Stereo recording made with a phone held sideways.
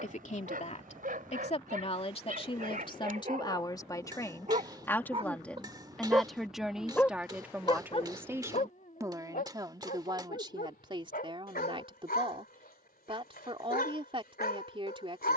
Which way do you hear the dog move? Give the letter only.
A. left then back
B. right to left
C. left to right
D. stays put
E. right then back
B.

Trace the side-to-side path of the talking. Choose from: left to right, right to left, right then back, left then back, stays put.
left to right.